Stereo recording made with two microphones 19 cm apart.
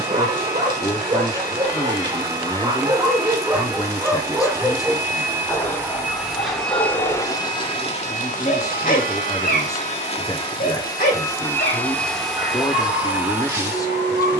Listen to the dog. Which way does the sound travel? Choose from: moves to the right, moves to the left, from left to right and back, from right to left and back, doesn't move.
moves to the left.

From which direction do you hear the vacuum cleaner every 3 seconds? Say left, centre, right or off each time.
right, right, left, left, centre.